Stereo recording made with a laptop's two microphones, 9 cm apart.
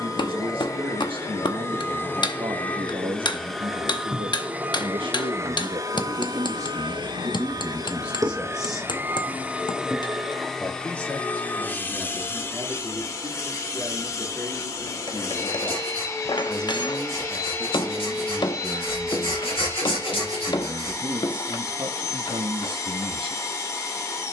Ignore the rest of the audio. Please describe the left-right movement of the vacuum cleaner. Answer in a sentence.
You can hear the vacuum cleaner go right and come back.